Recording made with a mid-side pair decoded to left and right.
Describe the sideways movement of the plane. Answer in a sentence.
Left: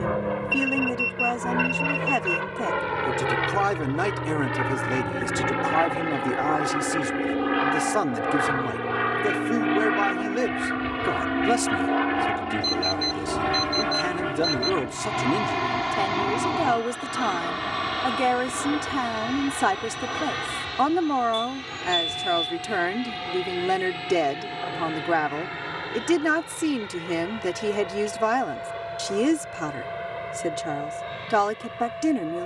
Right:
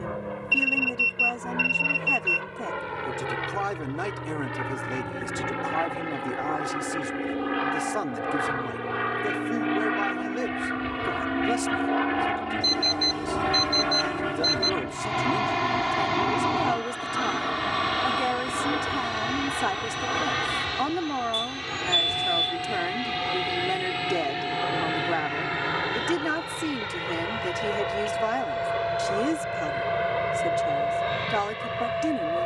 You can hear the plane go from the left side to the right.